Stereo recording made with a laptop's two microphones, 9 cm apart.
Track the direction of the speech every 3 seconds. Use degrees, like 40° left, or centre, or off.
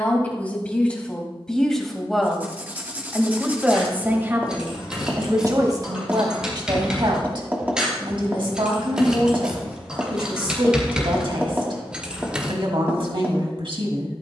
10° left, 30° right, 60° right, 60° right, 60° right.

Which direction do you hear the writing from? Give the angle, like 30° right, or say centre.
20° right.